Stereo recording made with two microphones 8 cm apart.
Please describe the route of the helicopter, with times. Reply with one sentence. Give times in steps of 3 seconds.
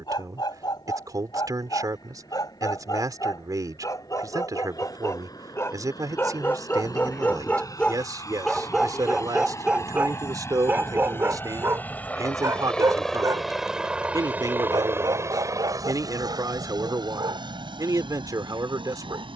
In this clip you hear the helicopter on the left from 0 s, in the centre from 12 s and on the right from 15 s.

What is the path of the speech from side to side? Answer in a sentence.
You can hear the speech stay in one place.